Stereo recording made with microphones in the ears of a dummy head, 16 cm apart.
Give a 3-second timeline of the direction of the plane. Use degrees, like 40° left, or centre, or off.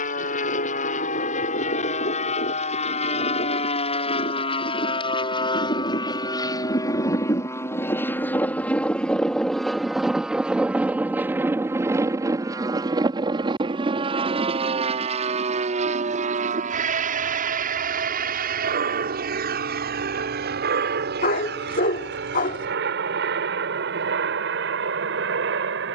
40° left, 30° left, 20° left, 10° right, 30° right, 40° right, 50° right, 60° right, 70° right.